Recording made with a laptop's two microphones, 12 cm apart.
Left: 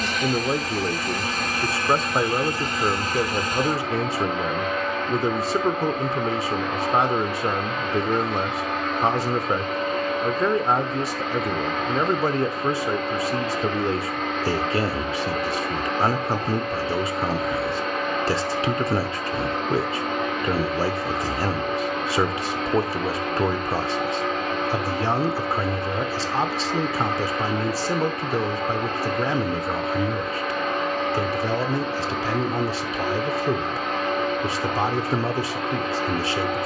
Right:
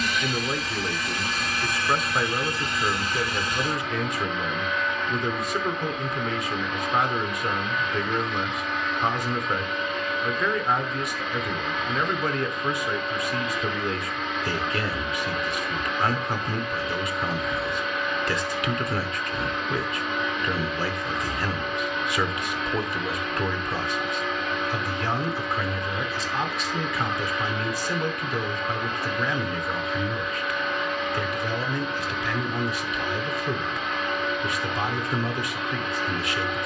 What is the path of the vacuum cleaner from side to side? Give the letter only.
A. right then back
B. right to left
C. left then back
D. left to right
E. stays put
E.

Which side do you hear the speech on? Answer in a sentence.
In this clip you hear the speech on the left.